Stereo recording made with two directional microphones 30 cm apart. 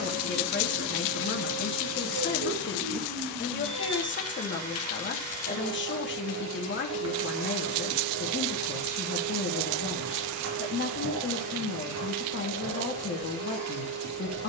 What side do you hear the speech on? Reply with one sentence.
You can hear the speech on the left.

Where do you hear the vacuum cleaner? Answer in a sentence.
In this clip you hear the vacuum cleaner on the right.